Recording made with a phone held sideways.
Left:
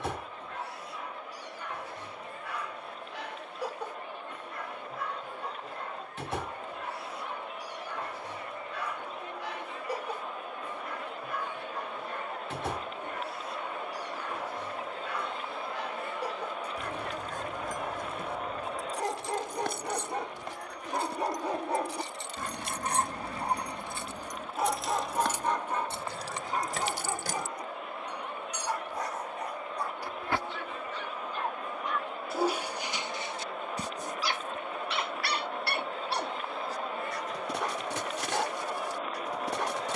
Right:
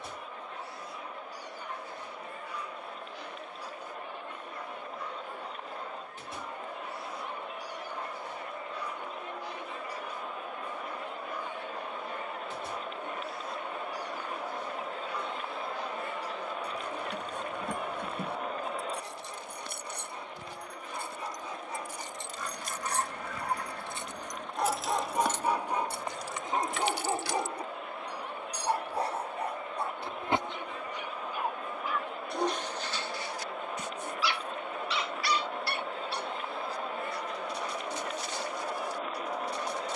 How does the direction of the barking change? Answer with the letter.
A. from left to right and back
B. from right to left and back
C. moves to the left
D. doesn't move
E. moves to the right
A.